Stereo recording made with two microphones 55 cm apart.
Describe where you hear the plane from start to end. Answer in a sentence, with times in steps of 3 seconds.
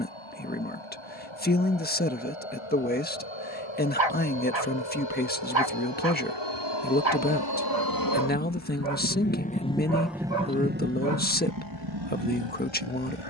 In this clip you hear the plane on the left from 0 s, in the centre from 9 s and on the right from 12 s.